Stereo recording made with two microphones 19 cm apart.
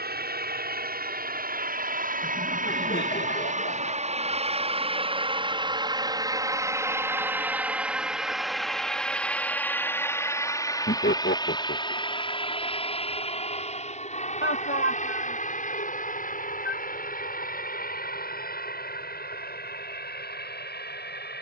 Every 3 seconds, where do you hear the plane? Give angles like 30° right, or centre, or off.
50° right, 30° right, 10° right, 10° left, 30° left, 40° left, 50° left.